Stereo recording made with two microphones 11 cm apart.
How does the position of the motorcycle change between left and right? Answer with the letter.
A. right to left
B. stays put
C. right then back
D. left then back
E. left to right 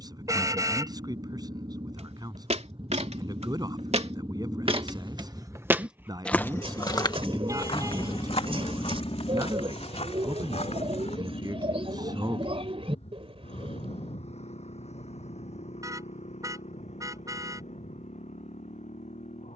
A.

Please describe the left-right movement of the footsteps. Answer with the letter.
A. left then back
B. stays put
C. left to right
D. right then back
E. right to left
E.